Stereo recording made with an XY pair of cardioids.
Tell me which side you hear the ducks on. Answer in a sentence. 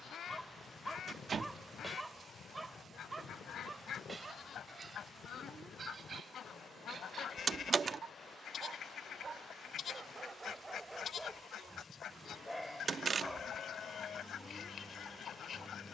In this clip you hear the ducks on the left.